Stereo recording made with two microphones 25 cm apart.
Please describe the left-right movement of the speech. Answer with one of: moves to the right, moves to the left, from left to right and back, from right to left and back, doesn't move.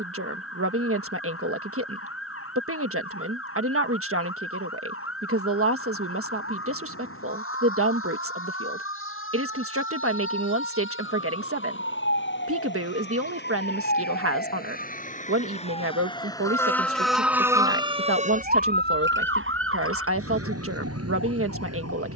doesn't move.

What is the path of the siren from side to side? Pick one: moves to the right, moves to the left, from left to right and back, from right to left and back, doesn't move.
moves to the right.